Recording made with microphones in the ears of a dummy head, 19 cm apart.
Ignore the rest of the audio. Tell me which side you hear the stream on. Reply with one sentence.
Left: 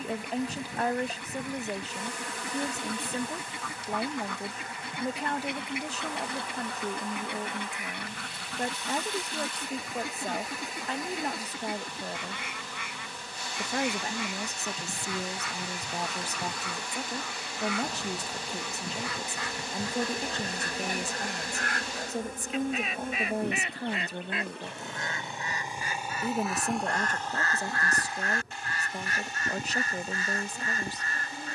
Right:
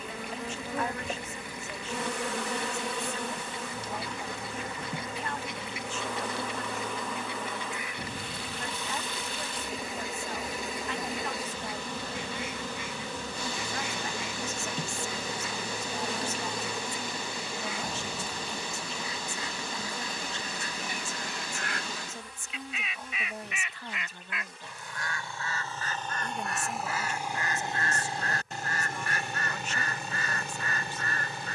In this clip you hear the stream on the right.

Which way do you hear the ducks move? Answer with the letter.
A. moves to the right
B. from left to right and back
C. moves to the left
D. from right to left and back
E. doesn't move
A.